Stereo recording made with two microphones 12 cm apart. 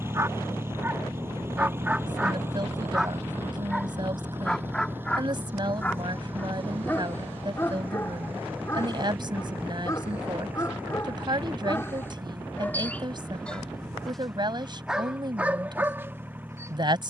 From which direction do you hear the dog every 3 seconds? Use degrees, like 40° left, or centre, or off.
10° right, 10° left, 20° left, 30° left, 10° left, 20° right.